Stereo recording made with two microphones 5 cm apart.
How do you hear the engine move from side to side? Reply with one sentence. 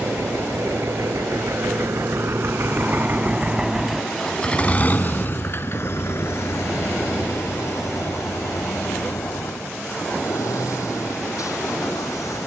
You can hear the engine travel towards the left.